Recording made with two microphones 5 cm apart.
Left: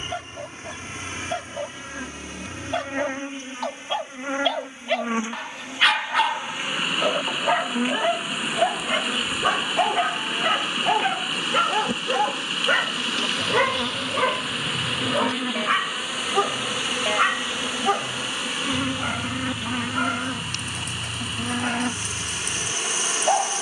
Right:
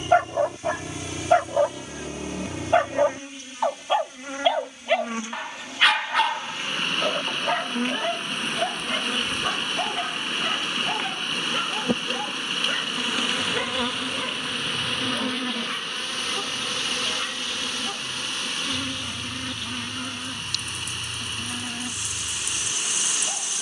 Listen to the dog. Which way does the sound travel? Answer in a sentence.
In this clip you hear the dog move from right to left.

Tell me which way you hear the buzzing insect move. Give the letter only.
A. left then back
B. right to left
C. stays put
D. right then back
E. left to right
D.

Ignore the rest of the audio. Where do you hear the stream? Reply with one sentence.
You can hear the stream in the centre.